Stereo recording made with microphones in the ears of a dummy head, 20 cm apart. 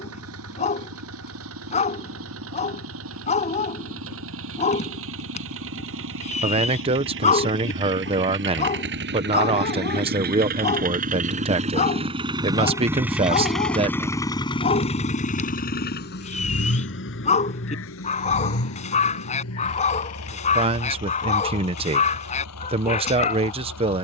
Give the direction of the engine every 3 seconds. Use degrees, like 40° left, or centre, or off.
70° right, 70° right, 60° right, 40° right, centre, 50° left, 70° left, 80° left.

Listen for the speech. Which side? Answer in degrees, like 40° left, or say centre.
30° right.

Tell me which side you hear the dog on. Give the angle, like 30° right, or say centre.
30° left.